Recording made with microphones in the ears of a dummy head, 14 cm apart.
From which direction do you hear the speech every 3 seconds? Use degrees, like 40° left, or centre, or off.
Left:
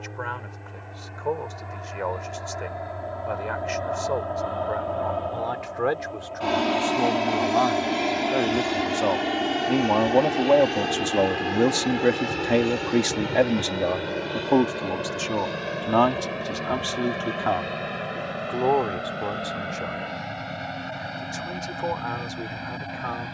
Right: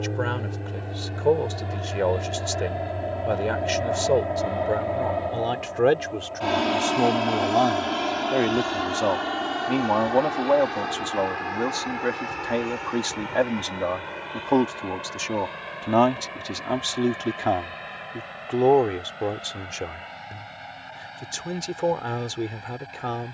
40° right, 40° right, 20° right, 20° left, 20° left, 10° right, 30° right, 30° right.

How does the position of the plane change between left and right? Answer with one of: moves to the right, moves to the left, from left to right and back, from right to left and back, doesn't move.
moves to the left.